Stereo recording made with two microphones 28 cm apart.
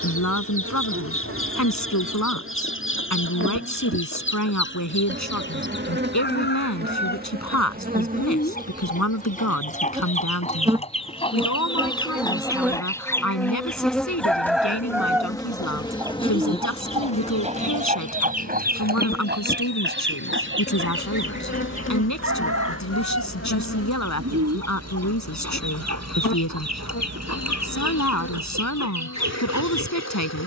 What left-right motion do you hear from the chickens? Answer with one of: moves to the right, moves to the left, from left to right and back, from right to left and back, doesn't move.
moves to the right.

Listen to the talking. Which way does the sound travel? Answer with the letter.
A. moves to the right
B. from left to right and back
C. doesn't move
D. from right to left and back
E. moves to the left
C.